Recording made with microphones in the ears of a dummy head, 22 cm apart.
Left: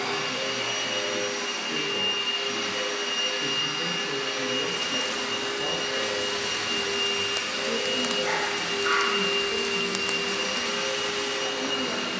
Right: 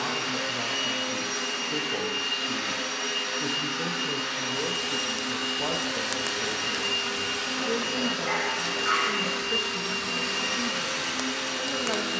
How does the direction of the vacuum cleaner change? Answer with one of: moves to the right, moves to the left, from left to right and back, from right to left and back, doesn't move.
doesn't move.